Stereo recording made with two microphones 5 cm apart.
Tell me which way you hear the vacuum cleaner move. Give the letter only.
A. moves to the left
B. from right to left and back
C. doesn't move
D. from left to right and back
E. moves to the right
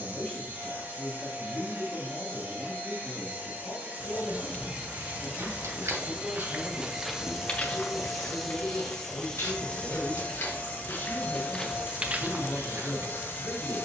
A.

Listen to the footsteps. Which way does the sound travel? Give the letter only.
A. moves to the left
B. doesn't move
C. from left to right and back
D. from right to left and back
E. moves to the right
D.